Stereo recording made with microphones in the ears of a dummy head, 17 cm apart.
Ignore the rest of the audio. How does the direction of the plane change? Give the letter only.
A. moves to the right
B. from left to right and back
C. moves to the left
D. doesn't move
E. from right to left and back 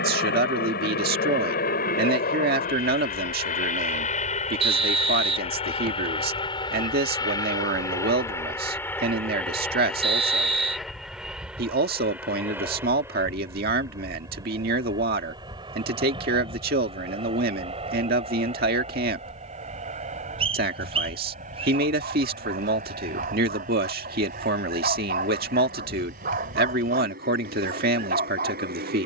A.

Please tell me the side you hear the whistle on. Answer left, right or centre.
right.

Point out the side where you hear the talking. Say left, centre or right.
right.